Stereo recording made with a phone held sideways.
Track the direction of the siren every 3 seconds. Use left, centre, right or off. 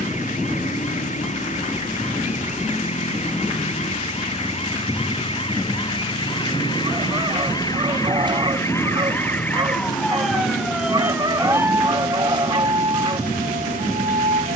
left, left, left, centre, right.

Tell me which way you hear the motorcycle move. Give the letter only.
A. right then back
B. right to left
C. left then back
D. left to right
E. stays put
E.